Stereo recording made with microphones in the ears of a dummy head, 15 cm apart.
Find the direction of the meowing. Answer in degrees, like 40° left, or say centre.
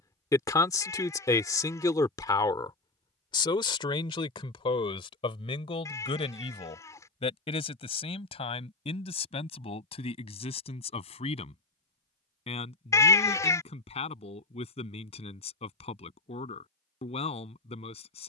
20° left.